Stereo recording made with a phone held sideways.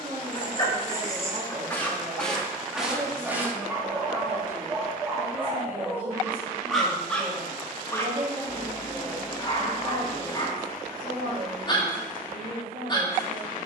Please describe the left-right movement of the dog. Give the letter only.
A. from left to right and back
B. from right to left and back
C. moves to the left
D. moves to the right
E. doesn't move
A.